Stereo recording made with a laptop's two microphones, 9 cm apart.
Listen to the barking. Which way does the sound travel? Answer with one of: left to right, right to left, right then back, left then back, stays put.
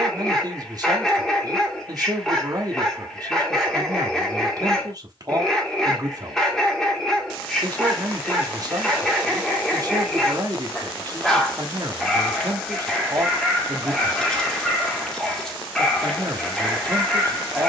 stays put.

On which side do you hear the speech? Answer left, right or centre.
right.